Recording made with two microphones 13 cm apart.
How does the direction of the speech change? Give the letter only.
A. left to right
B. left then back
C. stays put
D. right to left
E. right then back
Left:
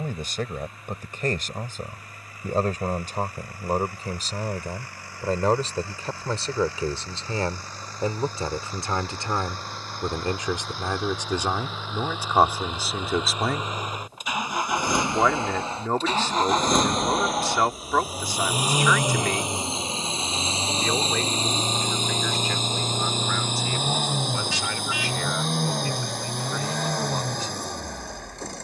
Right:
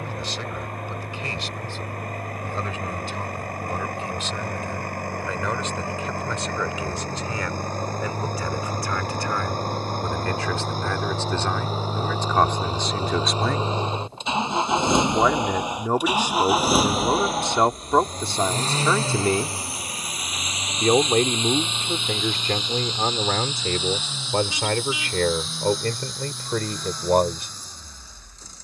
A.